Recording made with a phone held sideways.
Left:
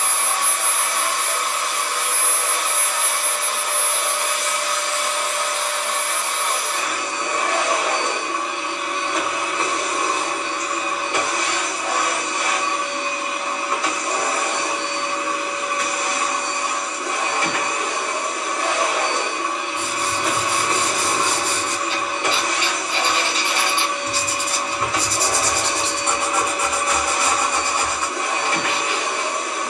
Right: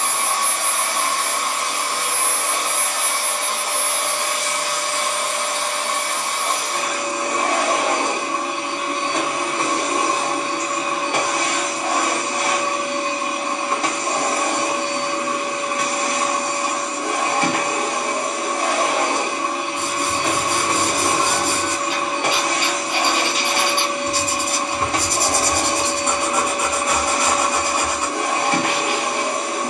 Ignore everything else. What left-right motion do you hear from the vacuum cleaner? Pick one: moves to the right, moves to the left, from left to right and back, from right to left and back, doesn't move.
doesn't move.